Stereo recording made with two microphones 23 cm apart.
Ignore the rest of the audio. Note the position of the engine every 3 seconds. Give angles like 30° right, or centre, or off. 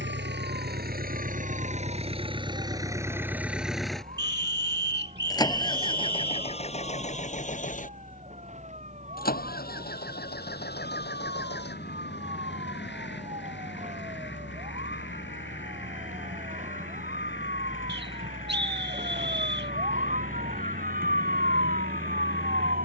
30° right, 10° left, 30° left, 40° left, 50° left, 50° left, 60° left, 60° left.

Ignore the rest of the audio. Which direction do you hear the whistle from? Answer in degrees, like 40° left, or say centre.
50° right.